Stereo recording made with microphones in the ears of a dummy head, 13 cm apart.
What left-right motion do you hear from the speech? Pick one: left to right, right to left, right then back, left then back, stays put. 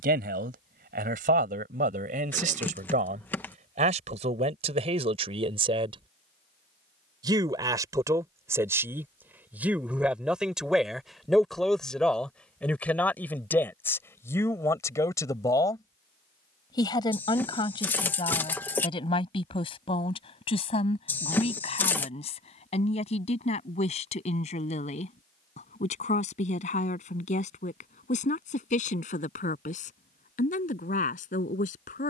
right to left.